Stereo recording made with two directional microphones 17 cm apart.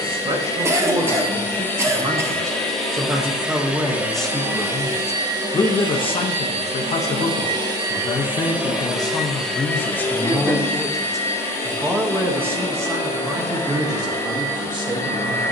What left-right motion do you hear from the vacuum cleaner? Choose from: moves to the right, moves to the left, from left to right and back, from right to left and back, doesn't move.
from left to right and back.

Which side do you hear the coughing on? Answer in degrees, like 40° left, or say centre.
20° right.